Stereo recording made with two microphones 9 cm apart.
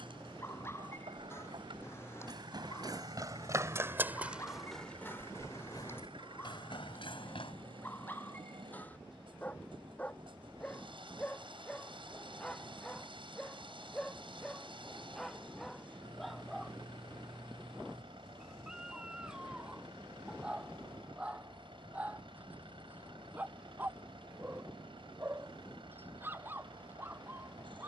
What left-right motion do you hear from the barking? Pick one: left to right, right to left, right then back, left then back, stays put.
left to right.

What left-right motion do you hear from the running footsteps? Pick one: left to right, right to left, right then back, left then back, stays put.
right to left.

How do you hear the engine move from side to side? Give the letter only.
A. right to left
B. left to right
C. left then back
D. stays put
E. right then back
D.